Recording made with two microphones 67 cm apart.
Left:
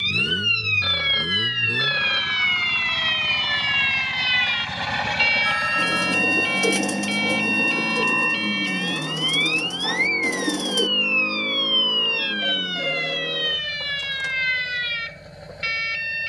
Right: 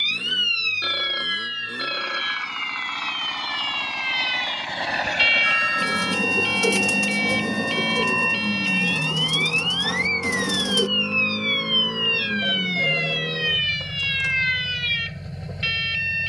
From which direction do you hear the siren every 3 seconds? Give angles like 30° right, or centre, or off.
30° left, centre, 30° right, 50° right, 50° right, 60° right.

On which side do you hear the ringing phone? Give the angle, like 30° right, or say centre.
30° left.